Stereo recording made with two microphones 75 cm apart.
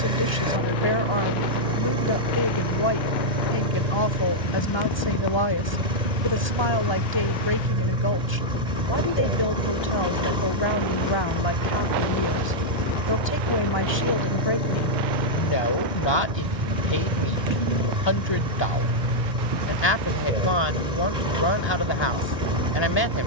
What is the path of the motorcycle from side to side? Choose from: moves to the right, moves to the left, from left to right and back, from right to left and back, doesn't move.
doesn't move.